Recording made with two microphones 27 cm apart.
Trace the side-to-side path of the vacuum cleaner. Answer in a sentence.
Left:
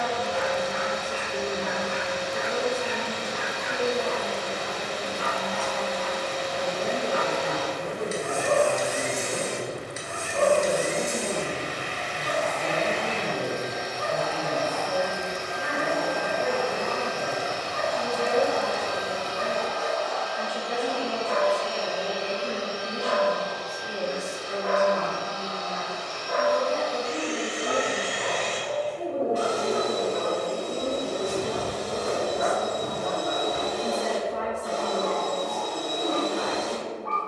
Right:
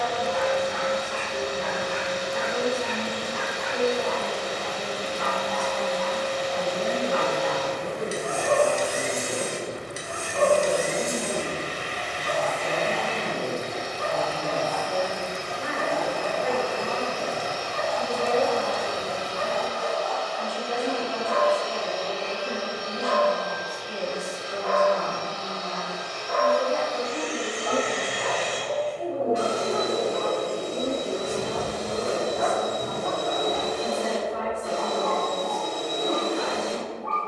You can hear the vacuum cleaner move from right to left and back again.